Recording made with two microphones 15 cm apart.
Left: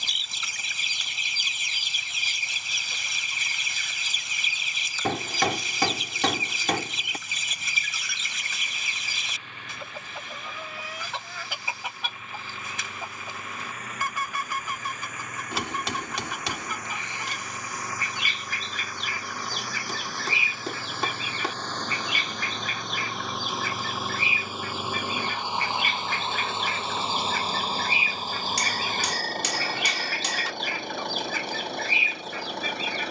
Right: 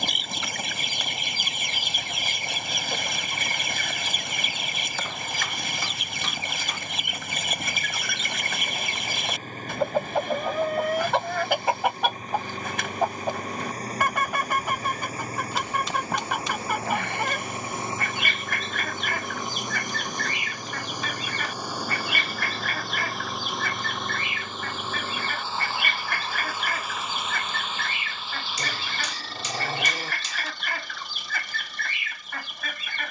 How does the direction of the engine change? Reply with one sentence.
In this clip you hear the engine travel towards the left.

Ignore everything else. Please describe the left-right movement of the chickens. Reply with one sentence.
You can hear the chickens stay in one place.